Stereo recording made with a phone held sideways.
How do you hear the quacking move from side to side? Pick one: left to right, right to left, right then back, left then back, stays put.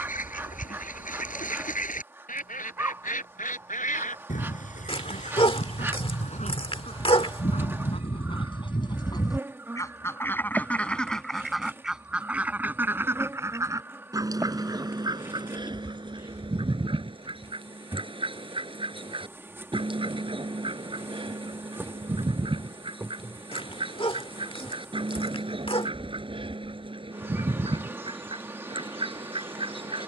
left to right.